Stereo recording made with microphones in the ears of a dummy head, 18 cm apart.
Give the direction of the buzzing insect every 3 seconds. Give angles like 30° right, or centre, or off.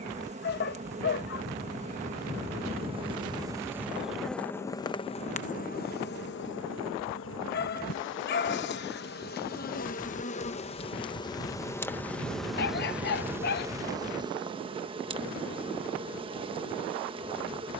30° right, 10° left, 60° left, 30° left, 10° right, 30° right.